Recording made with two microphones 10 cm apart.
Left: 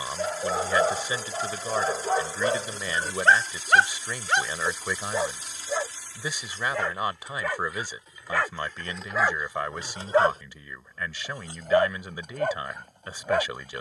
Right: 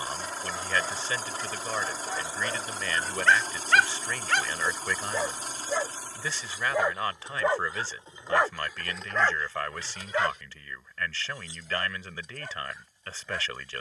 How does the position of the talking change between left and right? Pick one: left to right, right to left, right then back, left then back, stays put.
stays put.